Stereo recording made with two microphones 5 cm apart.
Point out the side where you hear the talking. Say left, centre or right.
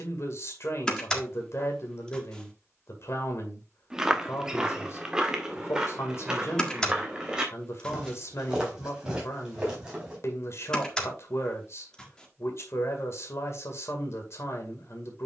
left.